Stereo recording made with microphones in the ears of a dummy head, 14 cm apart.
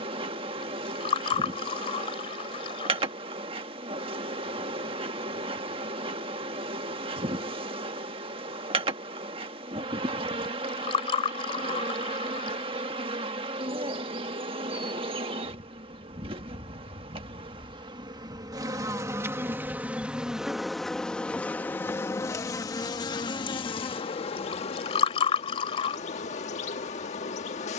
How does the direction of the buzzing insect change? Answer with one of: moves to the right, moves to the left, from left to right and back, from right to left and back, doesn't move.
moves to the left.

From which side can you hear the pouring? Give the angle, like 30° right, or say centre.
40° left.